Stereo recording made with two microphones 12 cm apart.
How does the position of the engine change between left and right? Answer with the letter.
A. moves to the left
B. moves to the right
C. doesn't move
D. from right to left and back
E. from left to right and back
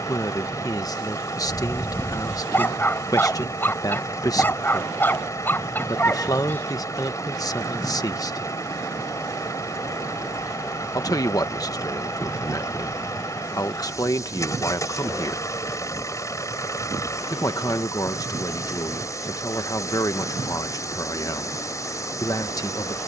C.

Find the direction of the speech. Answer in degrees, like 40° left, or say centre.
30° left.